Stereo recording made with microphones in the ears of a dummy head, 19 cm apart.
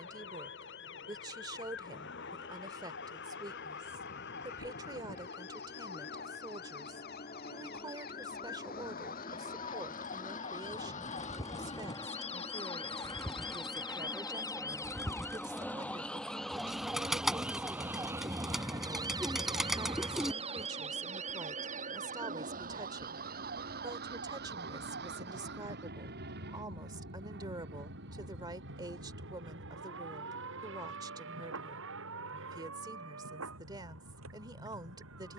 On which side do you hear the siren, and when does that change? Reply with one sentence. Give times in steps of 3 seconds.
In this clip you hear the siren on the left from 0 s, in the centre from 15 s and on the right from 18 s.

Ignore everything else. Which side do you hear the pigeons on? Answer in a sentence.
In this clip you hear the pigeons in the centre.